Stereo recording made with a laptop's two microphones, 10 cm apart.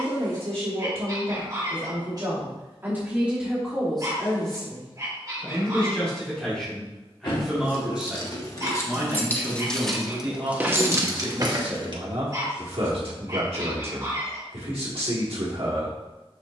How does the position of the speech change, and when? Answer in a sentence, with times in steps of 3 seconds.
You can hear the speech on the right from 0 s, in the centre from 3 s and on the right from 9 s.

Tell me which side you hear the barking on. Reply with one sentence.
You can hear the barking on the right.